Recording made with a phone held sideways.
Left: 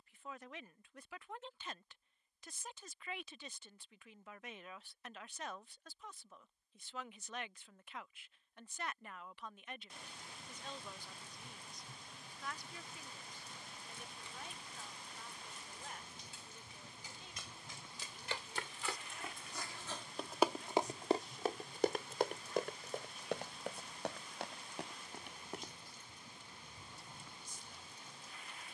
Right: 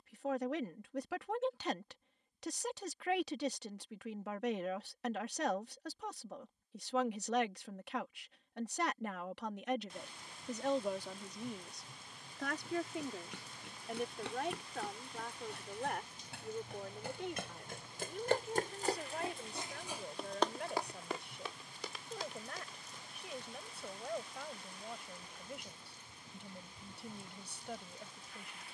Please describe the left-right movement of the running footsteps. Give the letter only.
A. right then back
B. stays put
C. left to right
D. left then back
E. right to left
E.